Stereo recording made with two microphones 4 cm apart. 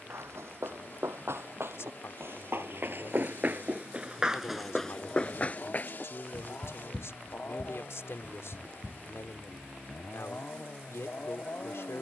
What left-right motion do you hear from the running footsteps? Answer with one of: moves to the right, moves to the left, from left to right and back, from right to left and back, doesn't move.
moves to the left.